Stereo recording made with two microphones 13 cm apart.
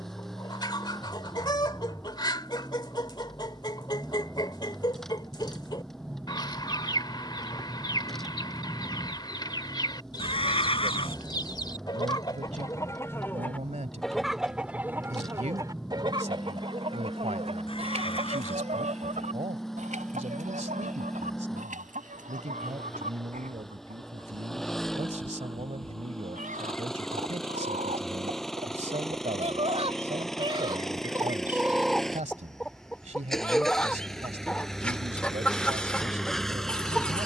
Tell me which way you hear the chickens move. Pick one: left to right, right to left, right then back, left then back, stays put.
right then back.